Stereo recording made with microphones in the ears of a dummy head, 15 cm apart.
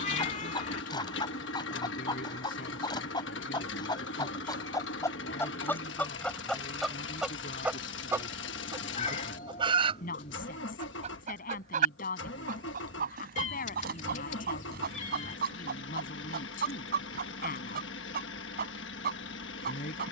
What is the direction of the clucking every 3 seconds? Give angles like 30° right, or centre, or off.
30° left, 20° left, centre, 40° right, 60° right, 60° right, 60° right.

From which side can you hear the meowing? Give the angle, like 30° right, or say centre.
40° left.